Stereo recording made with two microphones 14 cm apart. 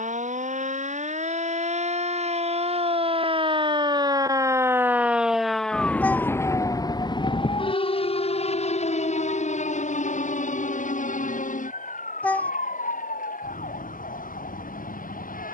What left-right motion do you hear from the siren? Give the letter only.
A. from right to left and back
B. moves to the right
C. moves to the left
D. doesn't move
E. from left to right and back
C.